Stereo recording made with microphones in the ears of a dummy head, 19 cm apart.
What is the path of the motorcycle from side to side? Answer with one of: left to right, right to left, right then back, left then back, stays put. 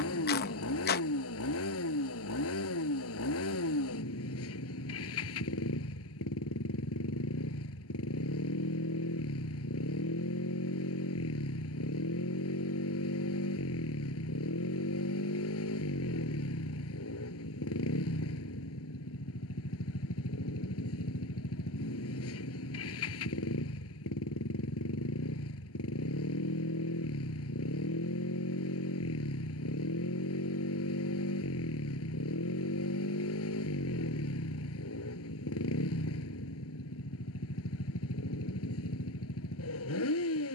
stays put.